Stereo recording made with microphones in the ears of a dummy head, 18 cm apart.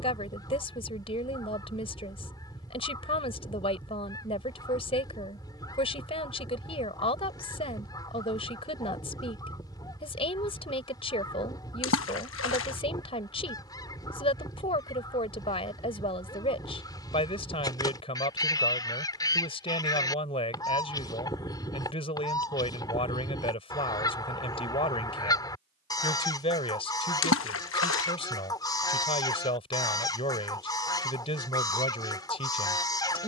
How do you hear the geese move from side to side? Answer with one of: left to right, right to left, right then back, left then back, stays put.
stays put.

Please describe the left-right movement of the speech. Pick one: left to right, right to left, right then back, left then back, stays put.
stays put.